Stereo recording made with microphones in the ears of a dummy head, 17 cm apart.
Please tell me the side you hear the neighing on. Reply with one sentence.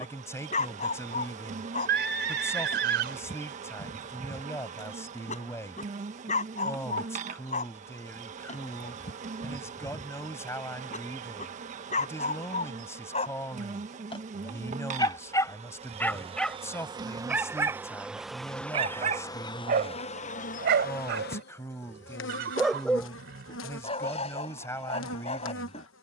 In this clip you hear the neighing on the right.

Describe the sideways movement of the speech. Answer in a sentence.
In this clip you hear the speech stay put.